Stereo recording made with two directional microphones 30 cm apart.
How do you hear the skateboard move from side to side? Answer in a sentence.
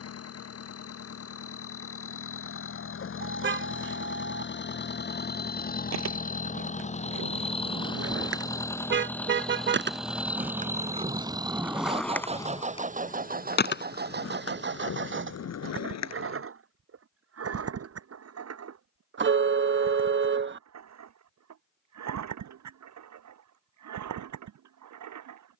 You can hear the skateboard move to the left.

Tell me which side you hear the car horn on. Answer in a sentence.
In this clip you hear the car horn on the right.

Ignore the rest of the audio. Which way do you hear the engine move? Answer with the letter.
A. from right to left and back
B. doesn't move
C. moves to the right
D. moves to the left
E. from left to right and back
C.